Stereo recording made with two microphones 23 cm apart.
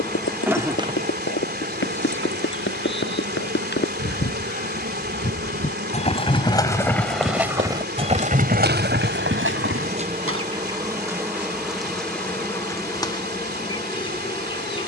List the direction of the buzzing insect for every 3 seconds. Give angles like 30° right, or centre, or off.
40° right, 70° right, 60° right, 20° right, 20° left.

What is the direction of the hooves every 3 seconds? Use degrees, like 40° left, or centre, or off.
60° left, 40° left, 10° right, 60° right, off.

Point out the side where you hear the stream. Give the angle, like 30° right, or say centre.
40° right.